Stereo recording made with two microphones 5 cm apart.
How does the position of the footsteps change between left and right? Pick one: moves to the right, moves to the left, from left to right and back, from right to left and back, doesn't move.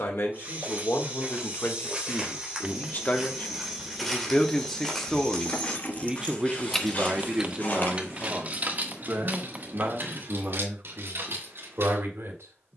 moves to the left.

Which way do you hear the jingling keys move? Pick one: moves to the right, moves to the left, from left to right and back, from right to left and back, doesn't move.
moves to the right.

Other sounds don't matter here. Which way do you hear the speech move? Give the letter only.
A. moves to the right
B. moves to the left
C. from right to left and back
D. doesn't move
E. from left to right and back
A.